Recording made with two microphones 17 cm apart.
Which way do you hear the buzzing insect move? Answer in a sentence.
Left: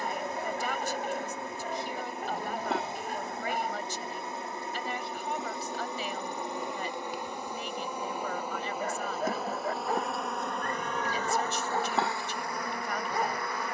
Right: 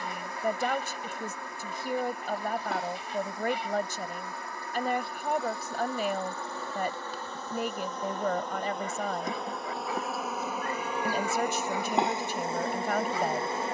You can hear the buzzing insect move to the right.